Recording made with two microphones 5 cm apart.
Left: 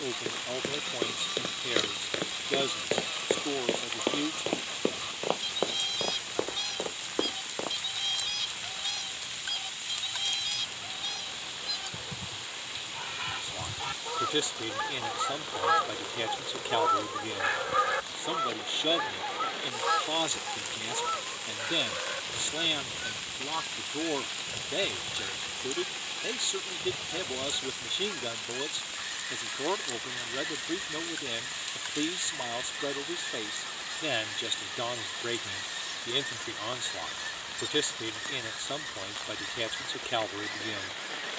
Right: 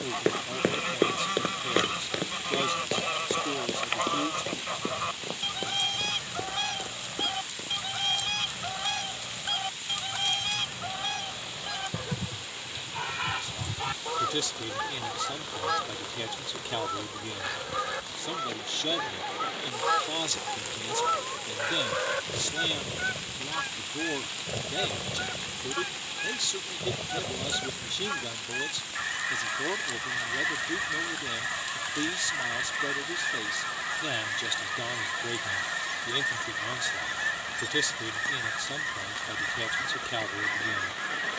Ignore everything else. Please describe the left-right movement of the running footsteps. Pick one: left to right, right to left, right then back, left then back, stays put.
right to left.